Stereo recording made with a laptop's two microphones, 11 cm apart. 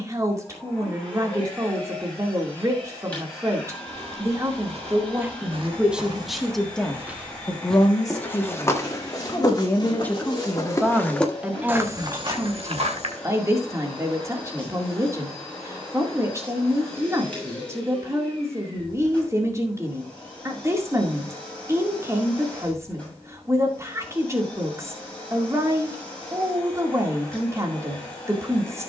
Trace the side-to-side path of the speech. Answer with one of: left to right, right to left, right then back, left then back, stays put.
left then back.